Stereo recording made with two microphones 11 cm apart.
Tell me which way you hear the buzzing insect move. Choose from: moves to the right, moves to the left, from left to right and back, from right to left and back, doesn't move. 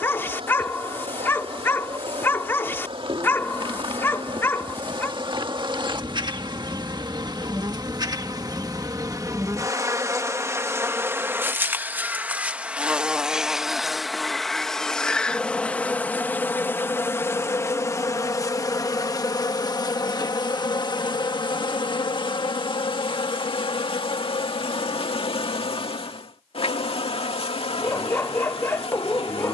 moves to the left.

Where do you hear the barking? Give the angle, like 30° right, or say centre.
20° left.